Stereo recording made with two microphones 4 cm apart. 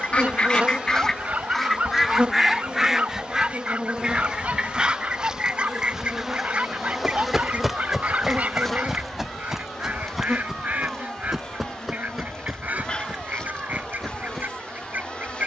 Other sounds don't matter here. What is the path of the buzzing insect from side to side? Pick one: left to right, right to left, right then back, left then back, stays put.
right to left.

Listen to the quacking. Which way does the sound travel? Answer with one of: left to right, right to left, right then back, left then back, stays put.
left to right.